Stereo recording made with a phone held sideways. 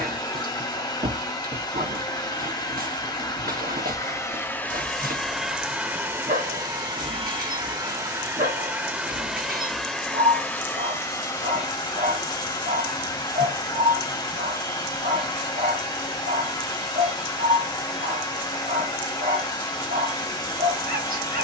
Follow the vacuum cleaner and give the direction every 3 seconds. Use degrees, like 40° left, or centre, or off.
30° left, 10° left, 20° right, 10° left, 30° left, 30° left, 30° left.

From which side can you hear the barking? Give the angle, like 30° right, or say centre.
70° right.